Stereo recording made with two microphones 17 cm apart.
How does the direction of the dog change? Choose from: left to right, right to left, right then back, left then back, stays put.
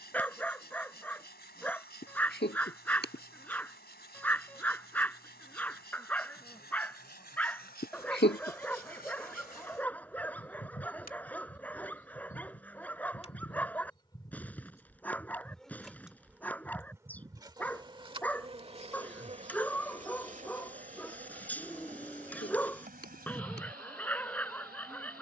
stays put.